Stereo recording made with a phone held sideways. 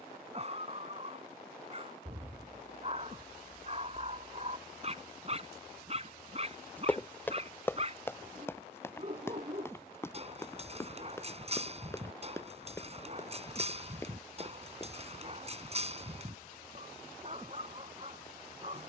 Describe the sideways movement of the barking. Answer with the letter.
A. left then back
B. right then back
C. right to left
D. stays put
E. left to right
D.